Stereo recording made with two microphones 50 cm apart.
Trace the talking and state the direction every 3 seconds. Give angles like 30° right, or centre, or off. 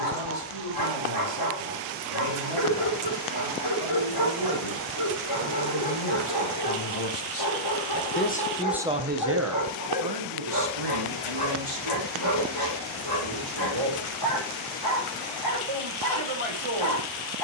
80° left, 80° left, 40° left, 50° right, 60° right, 60° right.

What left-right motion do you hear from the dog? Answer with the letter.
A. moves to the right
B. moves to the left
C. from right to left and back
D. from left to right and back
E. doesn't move
E.